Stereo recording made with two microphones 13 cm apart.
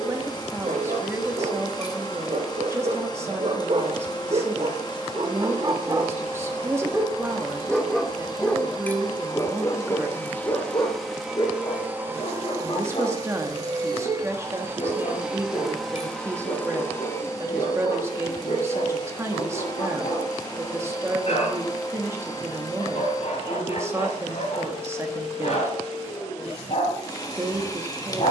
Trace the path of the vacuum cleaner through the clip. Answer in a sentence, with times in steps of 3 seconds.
You can hear the vacuum cleaner on the left from 0 s, in the centre from 9 s, on the right from 12 s, in the centre from 15 s and on the left from 18 s.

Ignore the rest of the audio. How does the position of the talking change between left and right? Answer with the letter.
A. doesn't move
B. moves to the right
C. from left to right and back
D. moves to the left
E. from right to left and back
A.